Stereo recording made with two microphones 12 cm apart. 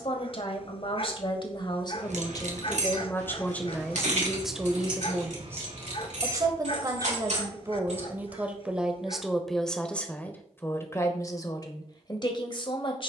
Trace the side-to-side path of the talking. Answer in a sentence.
You can hear the talking move from left to right and back again.